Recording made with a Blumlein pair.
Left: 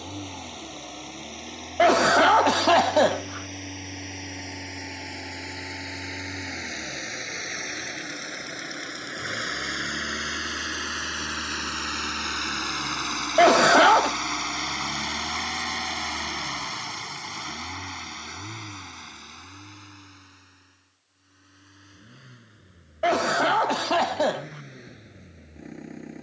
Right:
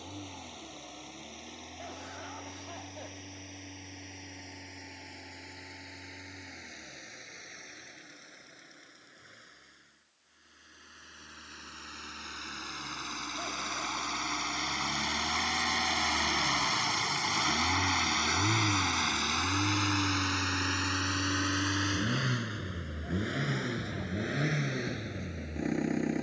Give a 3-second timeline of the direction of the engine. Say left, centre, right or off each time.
left, left, left, left, left, centre, right, right, right.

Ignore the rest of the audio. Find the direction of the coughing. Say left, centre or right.
left.